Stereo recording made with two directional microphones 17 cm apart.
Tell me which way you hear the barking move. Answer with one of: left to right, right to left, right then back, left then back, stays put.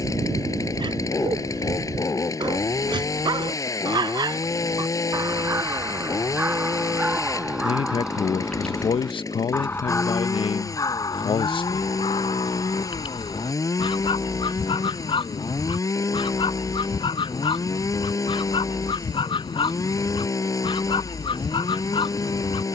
right to left.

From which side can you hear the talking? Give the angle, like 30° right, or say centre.
30° left.